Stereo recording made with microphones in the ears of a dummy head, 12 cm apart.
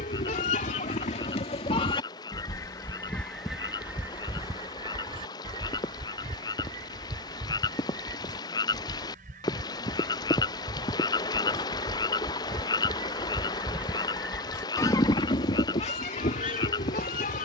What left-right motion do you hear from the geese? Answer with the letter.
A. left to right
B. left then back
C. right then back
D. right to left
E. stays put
C.